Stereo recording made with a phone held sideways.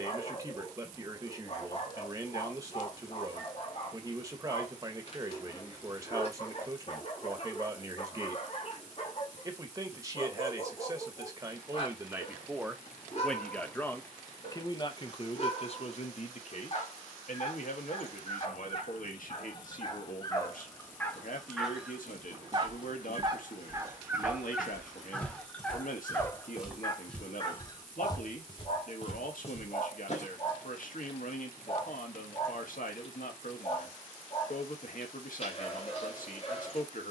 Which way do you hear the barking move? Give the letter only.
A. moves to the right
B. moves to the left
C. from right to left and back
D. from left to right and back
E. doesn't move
D.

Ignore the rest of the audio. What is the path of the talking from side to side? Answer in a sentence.
You can hear the talking move from right to left.